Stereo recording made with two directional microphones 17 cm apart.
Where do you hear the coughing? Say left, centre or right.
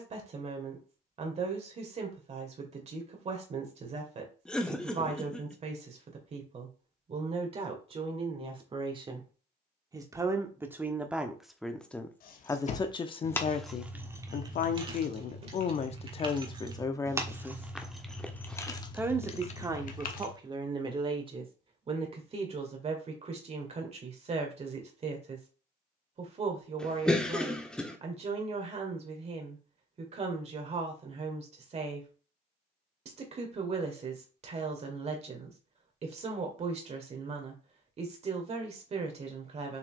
centre.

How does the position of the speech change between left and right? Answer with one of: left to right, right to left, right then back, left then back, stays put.
left then back.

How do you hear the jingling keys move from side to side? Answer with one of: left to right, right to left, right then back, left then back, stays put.
right then back.